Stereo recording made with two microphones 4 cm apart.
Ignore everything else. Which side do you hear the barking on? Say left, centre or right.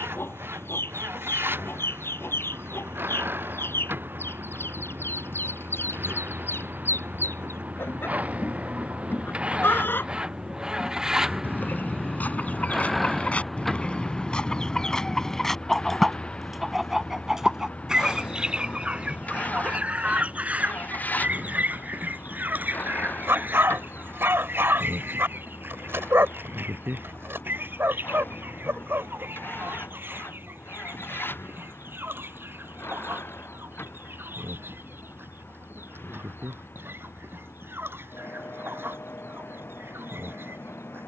right.